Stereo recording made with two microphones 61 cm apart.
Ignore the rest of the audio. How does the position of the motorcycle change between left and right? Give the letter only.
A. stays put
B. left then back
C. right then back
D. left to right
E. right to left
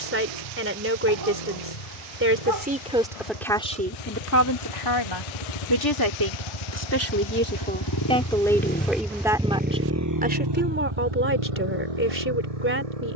D.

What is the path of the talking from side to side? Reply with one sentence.
In this clip you hear the talking move from right to left and back again.